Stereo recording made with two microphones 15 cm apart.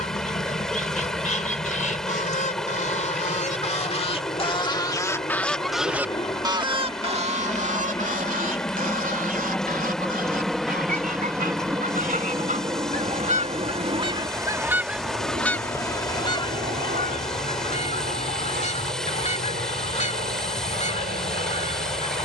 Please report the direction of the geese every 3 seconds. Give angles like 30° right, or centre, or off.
60° left, 30° left, 50° right, 70° right, 40° right, 30° left, 50° left, 50° left.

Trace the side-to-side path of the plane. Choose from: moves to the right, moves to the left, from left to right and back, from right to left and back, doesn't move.
moves to the right.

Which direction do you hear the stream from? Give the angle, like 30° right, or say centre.
centre.